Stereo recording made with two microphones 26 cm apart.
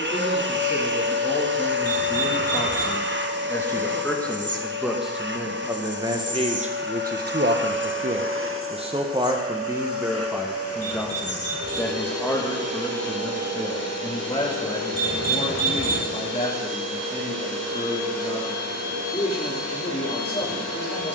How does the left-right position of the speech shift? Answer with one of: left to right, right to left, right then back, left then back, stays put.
right then back.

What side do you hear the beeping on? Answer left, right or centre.
left.